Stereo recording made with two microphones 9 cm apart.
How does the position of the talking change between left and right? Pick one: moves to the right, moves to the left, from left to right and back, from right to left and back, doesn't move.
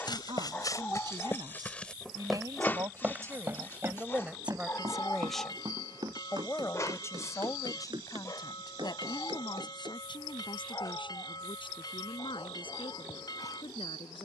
moves to the left.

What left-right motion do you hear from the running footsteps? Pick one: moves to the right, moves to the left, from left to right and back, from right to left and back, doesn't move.
moves to the right.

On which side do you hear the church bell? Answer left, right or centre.
left.